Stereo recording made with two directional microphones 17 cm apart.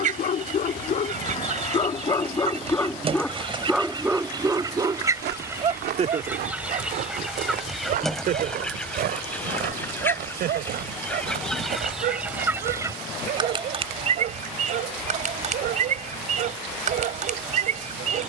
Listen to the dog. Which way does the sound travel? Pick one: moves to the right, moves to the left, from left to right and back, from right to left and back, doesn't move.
moves to the right.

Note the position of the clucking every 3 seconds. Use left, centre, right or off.
right, right, centre, centre, right, right.